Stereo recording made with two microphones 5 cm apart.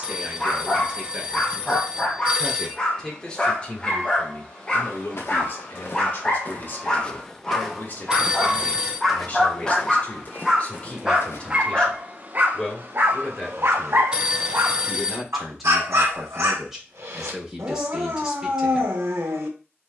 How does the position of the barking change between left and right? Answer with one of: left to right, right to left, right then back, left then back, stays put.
left to right.